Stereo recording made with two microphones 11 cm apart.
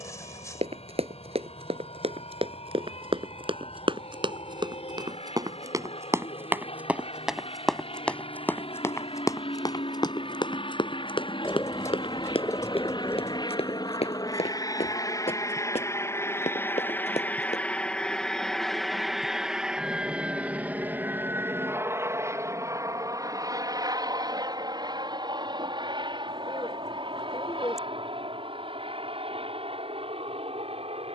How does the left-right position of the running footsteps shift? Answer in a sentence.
You can hear the running footsteps move to the left.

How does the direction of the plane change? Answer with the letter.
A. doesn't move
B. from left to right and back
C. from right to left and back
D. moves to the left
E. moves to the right
E.